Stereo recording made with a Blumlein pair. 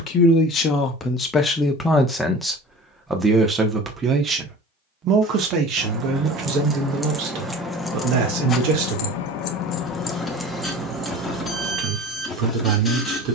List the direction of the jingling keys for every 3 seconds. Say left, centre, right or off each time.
off, right, centre, centre, off.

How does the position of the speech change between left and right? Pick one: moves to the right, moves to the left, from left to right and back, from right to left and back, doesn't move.
moves to the right.